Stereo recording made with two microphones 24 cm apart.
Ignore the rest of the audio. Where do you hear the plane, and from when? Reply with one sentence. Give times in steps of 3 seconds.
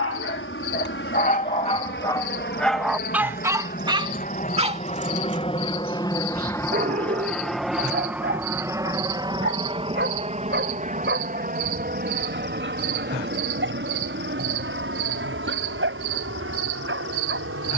In this clip you hear the plane on the left from 0 s, in the centre from 6 s and on the right from 9 s.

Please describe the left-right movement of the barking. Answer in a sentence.
In this clip you hear the barking move to the right.